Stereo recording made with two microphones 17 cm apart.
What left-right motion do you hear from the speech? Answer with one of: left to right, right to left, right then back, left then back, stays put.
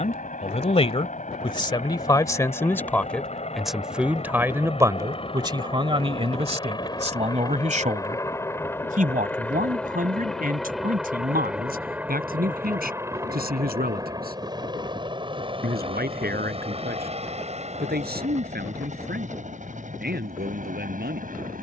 left to right.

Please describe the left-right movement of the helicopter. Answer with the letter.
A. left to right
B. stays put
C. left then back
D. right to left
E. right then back
A.